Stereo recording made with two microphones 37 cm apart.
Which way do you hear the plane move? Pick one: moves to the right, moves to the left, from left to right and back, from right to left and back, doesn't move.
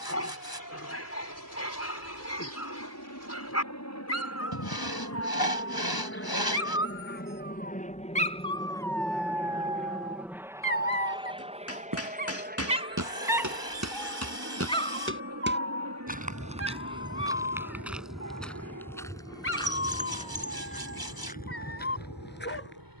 moves to the right.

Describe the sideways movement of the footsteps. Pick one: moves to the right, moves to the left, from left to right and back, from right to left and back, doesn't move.
moves to the left.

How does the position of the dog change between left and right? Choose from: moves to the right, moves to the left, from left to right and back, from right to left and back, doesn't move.
from left to right and back.